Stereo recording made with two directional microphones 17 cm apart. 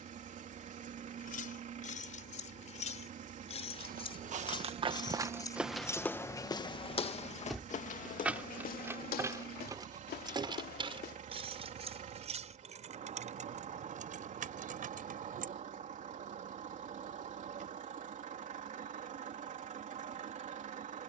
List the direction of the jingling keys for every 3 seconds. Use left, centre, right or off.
left, left, centre, right, right, right, off.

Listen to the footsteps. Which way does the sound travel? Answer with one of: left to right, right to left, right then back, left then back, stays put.
right to left.